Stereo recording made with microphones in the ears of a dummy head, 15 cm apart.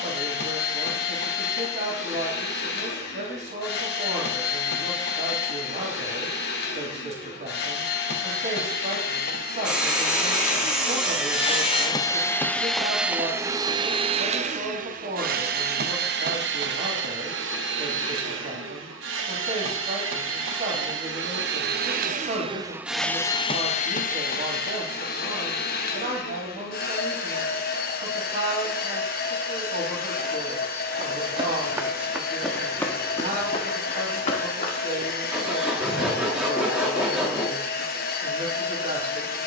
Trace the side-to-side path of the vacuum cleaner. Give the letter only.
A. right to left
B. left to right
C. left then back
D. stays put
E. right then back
E.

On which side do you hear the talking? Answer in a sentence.
In this clip you hear the talking on the right.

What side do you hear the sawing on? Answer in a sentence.
You can hear the sawing in the centre.